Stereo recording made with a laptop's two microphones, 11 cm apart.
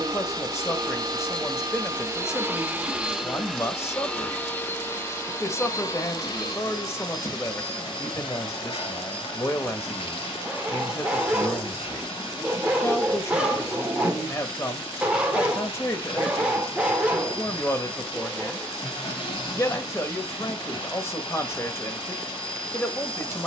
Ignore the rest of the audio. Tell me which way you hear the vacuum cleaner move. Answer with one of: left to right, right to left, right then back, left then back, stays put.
right to left.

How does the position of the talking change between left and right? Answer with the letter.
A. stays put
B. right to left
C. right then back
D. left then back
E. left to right
A.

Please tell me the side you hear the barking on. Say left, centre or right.
centre.